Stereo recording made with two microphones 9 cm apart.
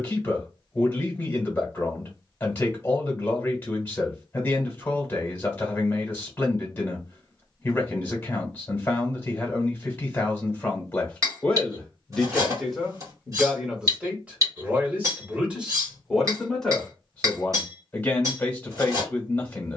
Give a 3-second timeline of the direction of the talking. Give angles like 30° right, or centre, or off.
20° left, 20° left, 20° left, 20° left, 10° right, centre, 20° left.